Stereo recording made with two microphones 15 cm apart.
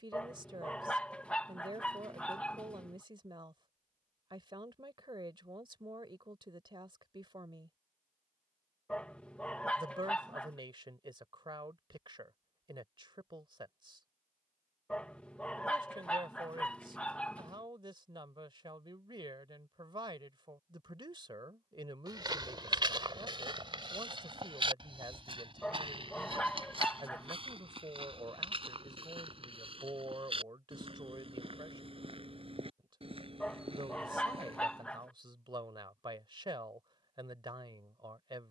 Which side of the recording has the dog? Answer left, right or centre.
centre.